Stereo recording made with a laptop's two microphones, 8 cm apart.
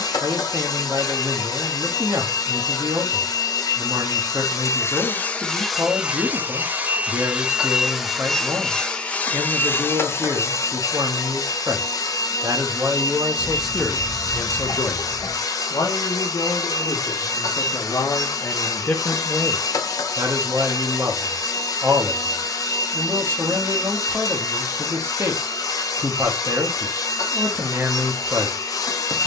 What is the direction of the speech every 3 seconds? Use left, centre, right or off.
right, right, right, right, centre, left, centre, right, right, right.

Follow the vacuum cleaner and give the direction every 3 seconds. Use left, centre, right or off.
left, left, centre, left, left, left, left, left, left, left.